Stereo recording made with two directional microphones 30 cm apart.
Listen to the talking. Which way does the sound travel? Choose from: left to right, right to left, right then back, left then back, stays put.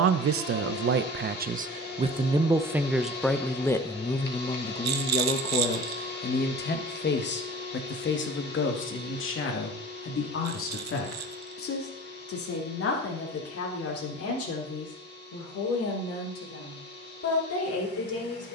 right to left.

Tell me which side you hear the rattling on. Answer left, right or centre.
right.